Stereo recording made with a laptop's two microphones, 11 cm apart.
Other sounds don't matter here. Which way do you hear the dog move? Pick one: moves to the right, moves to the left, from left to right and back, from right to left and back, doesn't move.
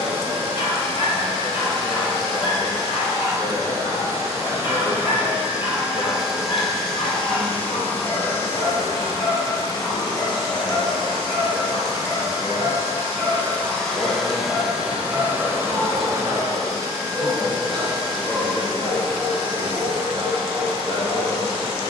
moves to the right.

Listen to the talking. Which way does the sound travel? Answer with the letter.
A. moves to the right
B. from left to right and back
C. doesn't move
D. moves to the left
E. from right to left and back
B.